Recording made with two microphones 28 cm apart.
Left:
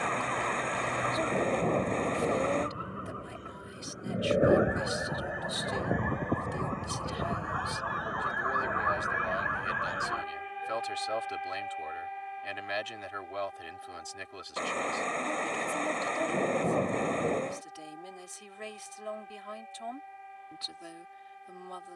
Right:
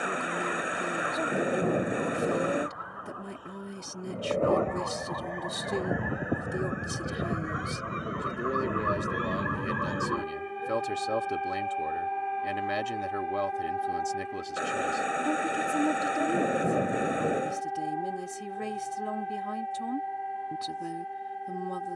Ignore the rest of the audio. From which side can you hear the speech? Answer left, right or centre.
right.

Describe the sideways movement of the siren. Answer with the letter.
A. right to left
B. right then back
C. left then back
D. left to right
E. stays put
D.